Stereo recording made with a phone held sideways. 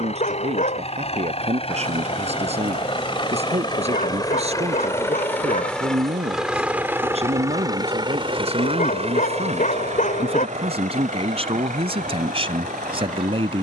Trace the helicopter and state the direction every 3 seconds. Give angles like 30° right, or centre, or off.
50° left, 20° left, 20° right, 60° right, 70° right.